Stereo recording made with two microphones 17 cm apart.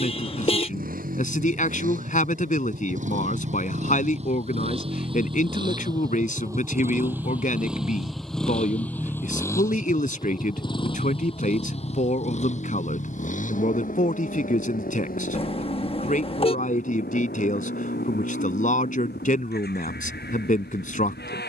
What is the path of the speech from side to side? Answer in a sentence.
In this clip you hear the speech stay put.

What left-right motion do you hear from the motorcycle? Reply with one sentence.
You can hear the motorcycle travel towards the left.